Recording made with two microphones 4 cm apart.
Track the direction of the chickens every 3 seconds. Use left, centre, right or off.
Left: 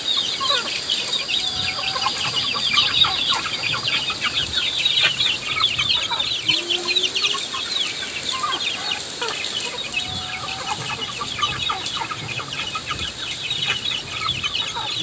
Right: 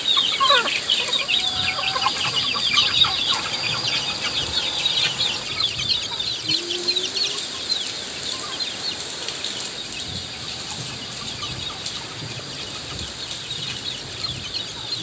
centre, left, left, left, left.